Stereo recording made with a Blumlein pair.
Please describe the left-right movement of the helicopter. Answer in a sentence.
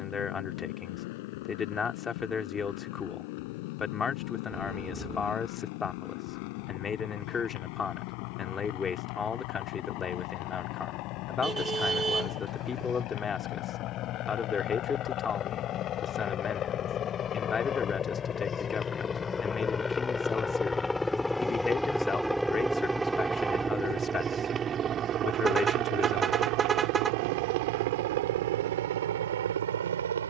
You can hear the helicopter go from the left side to the right.